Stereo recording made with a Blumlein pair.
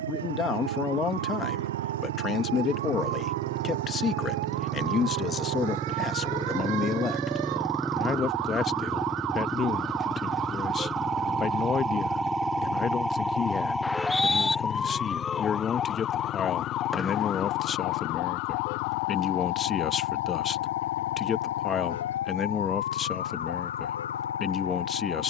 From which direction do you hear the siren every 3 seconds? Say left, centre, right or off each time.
right, right, right, right, centre, left, left, left, left.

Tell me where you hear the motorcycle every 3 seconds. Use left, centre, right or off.
right, right, centre, centre, left, left, left, left, left.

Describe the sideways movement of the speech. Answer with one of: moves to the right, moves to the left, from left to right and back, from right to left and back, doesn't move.
doesn't move.